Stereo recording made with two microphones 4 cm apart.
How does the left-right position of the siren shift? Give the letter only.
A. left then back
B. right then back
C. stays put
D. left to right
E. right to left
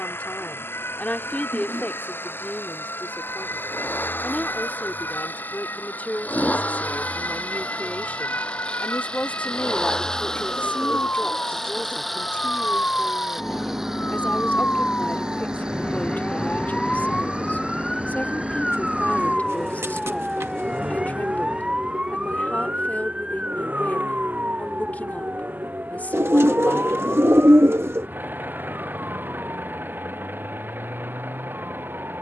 D.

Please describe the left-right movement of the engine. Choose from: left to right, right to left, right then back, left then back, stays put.
left to right.